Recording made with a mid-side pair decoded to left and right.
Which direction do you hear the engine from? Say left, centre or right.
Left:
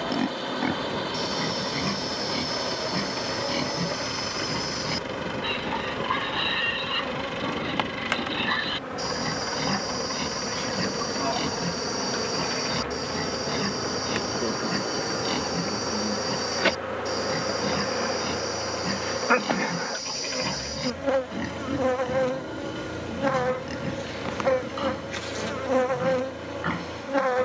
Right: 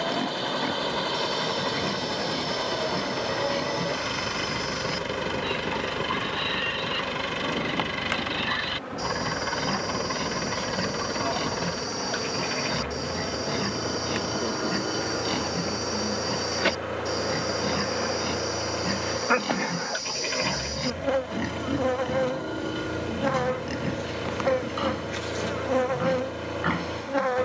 right.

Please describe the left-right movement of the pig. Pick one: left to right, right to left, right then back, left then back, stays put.
left to right.